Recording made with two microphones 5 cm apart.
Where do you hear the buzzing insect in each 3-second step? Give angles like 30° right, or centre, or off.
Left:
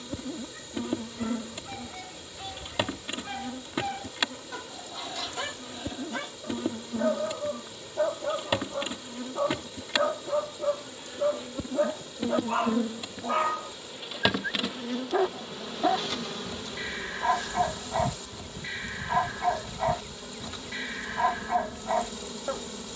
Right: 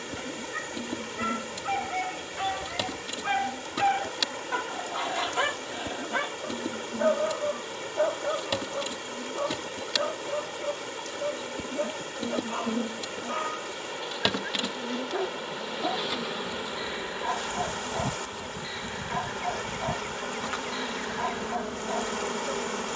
30° left, 30° left, 30° left, 20° left, 10° left, 10° right, 50° right, 70° right.